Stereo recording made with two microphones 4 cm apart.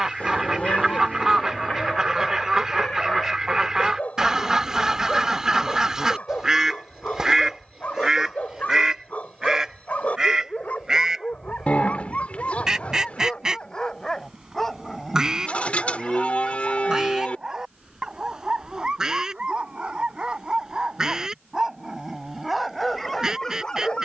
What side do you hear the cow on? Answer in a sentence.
You can hear the cow on the left.